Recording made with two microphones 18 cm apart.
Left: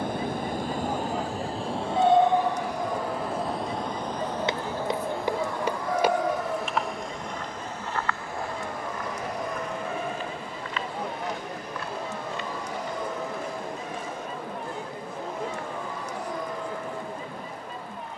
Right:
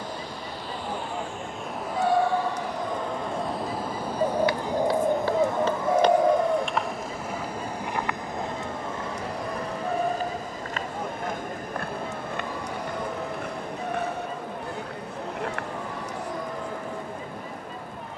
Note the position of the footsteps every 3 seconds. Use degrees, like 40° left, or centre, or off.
off, 20° left, 10° right, 40° right, 70° right, 70° right.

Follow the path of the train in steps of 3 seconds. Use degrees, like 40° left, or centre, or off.
30° left, 10° right, 30° right, 40° right, 50° right, 50° right.